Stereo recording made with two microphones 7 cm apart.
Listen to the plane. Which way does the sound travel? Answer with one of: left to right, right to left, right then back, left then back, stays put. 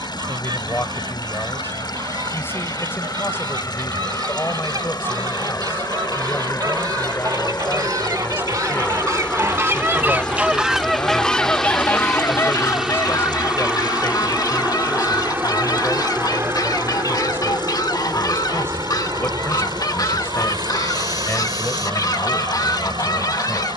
left to right.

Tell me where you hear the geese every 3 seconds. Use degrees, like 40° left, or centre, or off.
70° right, 70° right, 60° right, 10° right, 50° left, 60° left, 60° left, 60° left.